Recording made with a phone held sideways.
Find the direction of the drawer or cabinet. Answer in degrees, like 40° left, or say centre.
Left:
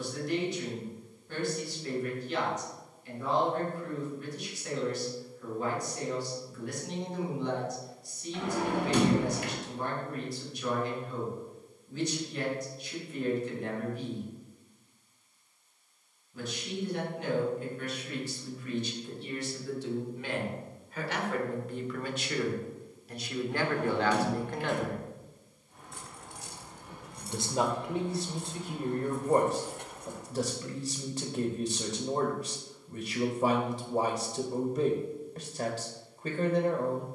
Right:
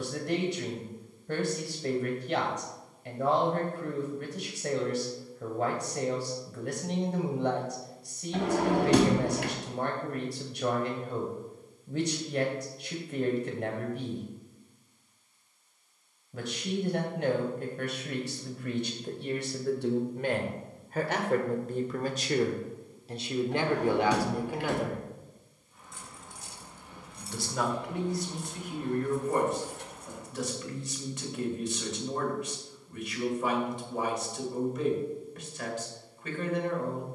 80° right.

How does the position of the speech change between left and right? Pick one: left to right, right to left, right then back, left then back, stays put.
right to left.